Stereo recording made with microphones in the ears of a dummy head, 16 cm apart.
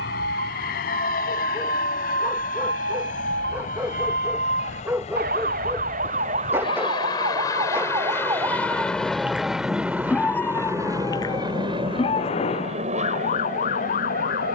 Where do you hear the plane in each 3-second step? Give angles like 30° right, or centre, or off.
60° left, 40° left, 20° left, 10° right, 40° right.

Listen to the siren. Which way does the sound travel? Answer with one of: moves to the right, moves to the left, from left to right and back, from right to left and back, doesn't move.
moves to the left.